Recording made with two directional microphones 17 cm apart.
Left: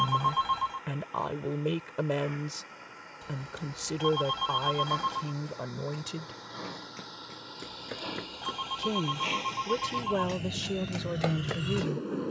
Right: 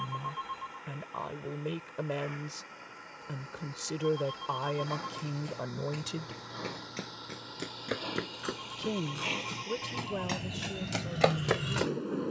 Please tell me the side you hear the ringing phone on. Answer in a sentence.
You can hear the ringing phone on the left.